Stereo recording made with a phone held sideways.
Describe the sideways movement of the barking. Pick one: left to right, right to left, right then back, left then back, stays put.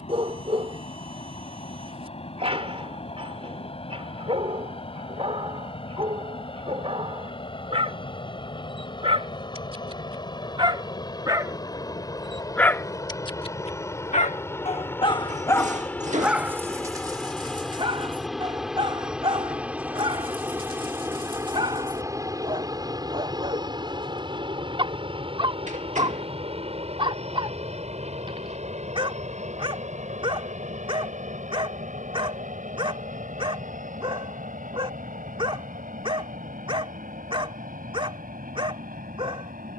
left then back.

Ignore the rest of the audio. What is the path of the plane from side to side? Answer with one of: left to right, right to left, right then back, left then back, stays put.
left to right.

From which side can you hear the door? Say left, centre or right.
right.